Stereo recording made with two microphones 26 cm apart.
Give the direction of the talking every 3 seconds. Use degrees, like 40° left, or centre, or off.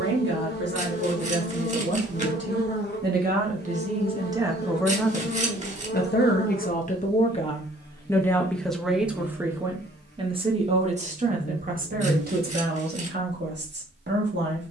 50° right, 10° right, 20° left, 20° right, 40° right.